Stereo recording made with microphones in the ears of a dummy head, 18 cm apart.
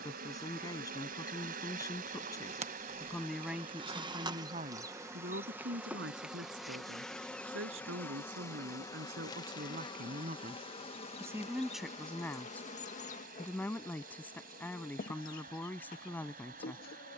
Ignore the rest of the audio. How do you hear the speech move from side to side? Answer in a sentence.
In this clip you hear the speech go right and come back.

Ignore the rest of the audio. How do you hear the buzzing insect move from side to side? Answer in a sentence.
You can hear the buzzing insect move to the left.